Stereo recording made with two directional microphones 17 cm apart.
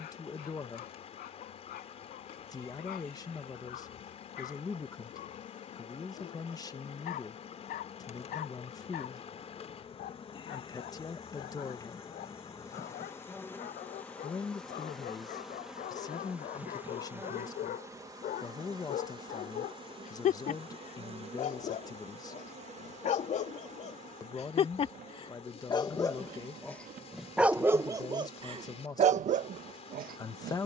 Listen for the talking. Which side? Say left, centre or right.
left.